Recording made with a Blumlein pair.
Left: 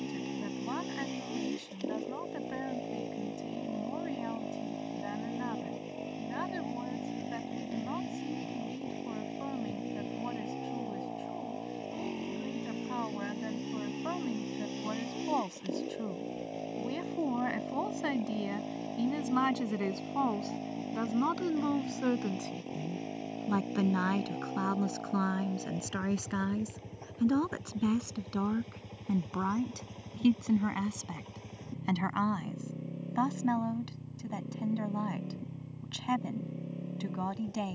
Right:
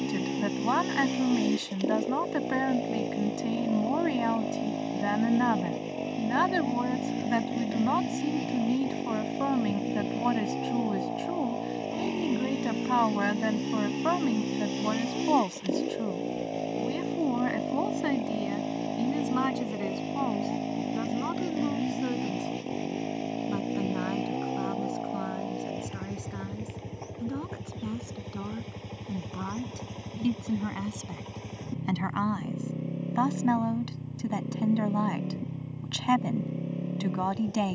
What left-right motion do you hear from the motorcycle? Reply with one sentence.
In this clip you hear the motorcycle stay put.